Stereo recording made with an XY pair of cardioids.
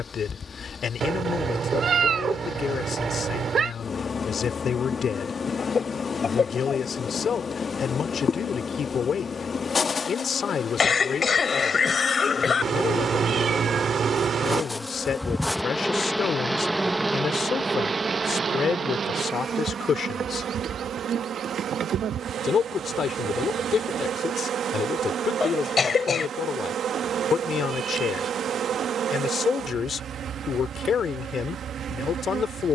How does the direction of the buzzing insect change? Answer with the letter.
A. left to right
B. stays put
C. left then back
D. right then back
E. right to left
A.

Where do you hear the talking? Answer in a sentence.
In this clip you hear the talking on the left.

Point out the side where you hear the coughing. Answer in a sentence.
You can hear the coughing on the left.